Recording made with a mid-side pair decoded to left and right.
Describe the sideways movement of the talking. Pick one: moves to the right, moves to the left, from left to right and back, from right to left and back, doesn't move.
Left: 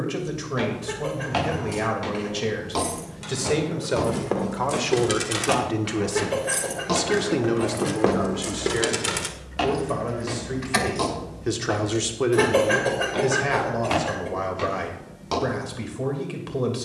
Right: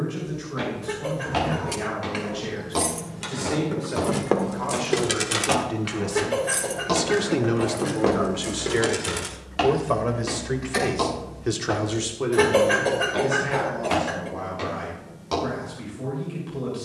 from left to right and back.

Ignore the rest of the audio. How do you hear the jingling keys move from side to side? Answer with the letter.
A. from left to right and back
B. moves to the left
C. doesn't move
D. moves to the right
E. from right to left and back
B.